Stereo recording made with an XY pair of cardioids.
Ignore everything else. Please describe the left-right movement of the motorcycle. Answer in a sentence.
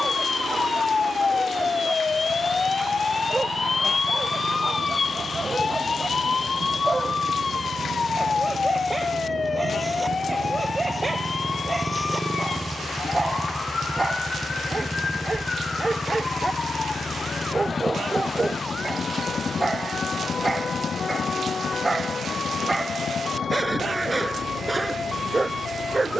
In this clip you hear the motorcycle go from the right side to the left.